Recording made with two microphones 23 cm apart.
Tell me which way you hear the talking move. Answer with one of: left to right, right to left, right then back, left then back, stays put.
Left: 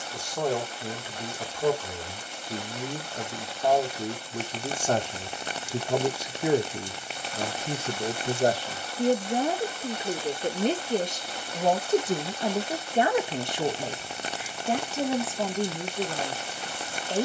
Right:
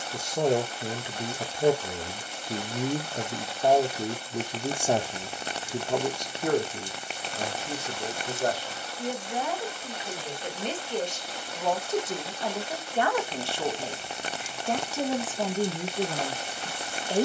left then back.